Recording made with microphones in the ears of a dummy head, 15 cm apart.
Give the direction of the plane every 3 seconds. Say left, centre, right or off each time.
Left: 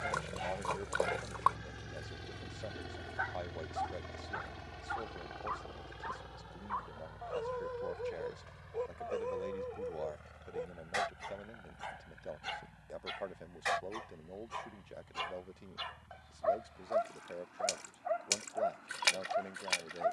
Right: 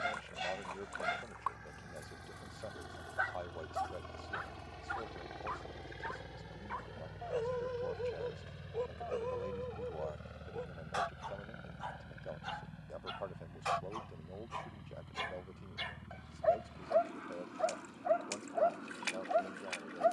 left, centre, right, right, right, right, right.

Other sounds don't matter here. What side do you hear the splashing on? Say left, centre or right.
left.